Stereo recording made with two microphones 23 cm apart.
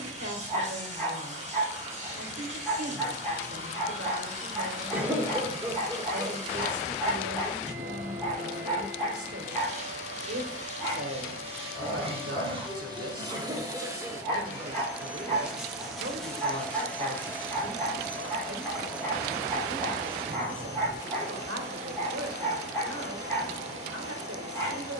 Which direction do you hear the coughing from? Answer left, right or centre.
centre.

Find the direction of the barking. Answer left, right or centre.
centre.